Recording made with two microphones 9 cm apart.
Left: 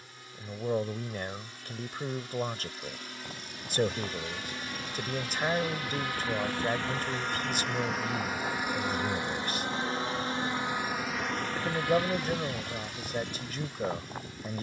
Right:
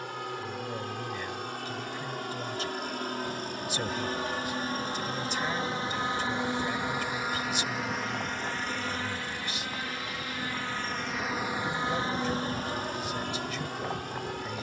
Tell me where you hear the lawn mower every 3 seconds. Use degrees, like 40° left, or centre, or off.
60° right, 40° right, 10° right, 10° left, 50° right.